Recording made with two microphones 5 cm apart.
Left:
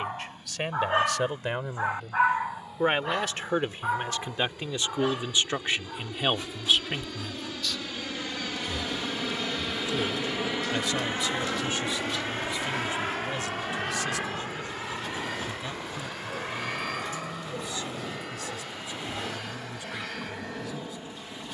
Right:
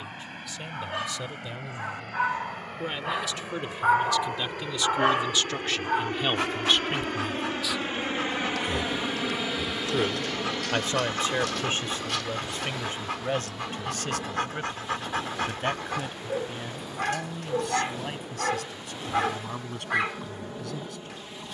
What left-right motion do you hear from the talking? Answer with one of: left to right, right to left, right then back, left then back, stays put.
left to right.